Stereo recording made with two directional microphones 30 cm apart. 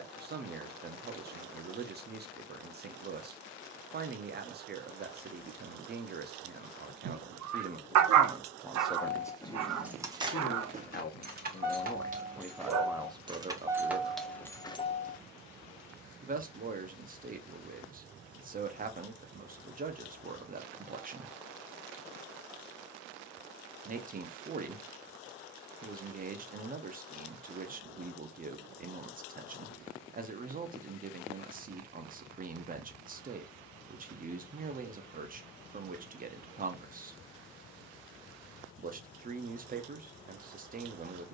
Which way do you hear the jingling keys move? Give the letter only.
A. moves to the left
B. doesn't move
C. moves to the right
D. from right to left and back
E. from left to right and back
E.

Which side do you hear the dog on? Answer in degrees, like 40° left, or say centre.
60° right.